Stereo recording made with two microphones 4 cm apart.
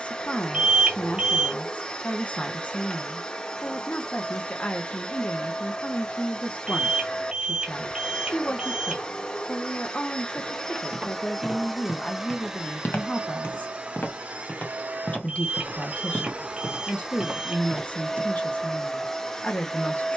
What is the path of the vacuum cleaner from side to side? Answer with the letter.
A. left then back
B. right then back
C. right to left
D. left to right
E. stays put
B.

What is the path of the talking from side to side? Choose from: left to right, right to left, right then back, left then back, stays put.
stays put.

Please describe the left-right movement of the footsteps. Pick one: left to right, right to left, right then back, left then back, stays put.
left then back.